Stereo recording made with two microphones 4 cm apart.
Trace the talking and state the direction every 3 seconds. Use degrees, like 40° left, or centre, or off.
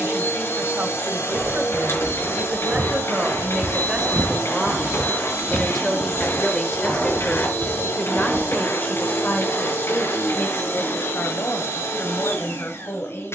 30° right, 10° right, 30° left, 50° left, 70° left.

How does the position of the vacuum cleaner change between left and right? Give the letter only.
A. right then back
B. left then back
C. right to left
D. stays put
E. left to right
D.